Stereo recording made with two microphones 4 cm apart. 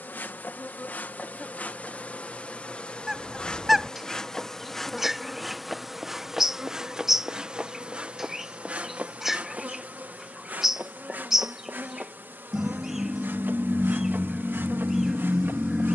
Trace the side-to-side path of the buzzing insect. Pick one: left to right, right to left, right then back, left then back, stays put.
left to right.